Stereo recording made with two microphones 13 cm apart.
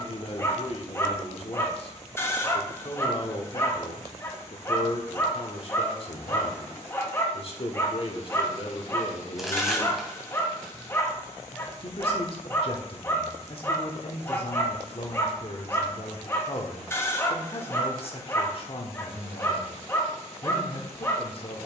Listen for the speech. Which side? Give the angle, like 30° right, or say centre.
50° left.